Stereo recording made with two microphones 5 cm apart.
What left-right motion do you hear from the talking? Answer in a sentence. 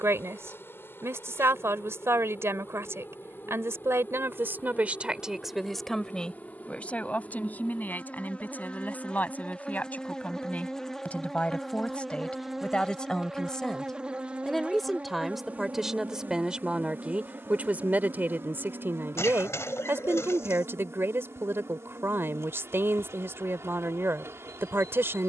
In this clip you hear the talking go left and come back.